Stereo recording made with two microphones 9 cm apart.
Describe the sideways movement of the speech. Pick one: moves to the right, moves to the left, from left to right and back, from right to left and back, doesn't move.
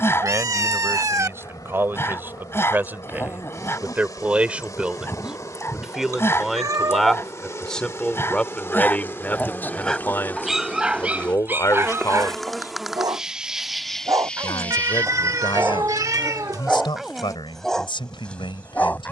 moves to the left.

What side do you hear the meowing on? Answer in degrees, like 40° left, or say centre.
40° right.